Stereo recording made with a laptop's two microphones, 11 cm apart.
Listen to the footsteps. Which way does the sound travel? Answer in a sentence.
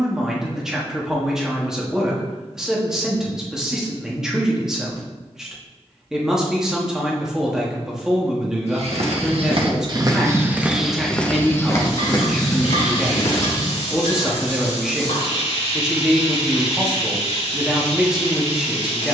In this clip you hear the footsteps go from the right side to the left.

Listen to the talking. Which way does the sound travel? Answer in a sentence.
You can hear the talking stay put.